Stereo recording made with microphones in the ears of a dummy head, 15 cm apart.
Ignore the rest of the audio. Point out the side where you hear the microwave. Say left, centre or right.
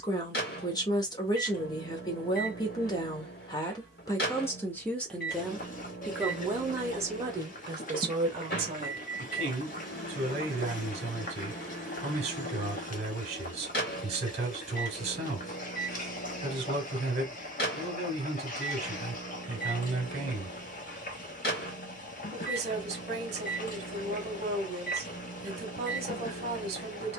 left.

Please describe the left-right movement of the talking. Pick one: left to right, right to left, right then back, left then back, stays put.
left to right.